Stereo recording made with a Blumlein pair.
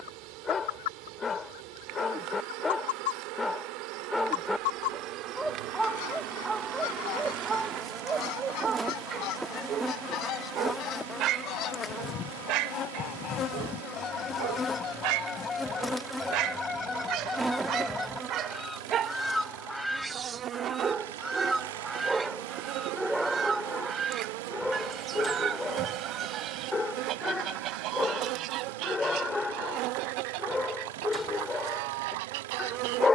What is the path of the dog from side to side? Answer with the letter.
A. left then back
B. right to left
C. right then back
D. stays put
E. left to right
C.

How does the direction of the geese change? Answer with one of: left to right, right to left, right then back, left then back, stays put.
left to right.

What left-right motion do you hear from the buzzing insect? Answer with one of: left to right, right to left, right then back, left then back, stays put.
left then back.